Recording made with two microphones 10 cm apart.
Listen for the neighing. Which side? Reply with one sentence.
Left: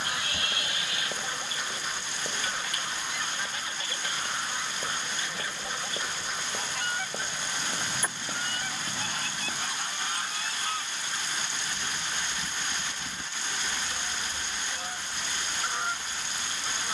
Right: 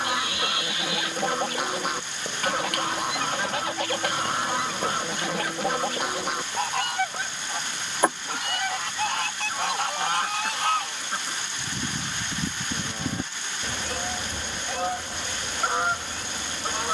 You can hear the neighing on the left.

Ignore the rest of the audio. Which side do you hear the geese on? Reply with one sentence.
In this clip you hear the geese on the right.